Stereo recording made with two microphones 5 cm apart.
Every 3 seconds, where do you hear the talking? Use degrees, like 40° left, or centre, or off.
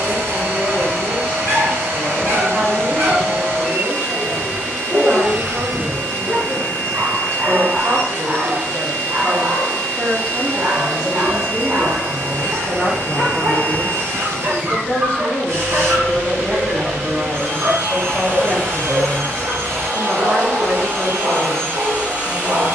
40° right, 40° right, 40° right, 20° right, 20° left, 10° left, 40° right, 40° right.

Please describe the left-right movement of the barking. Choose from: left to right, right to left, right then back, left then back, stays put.
stays put.